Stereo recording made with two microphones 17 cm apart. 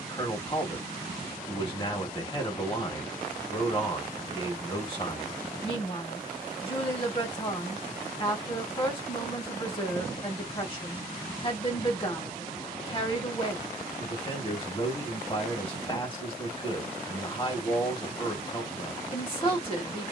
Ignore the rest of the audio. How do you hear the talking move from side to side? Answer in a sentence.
You can hear the talking stay in one place.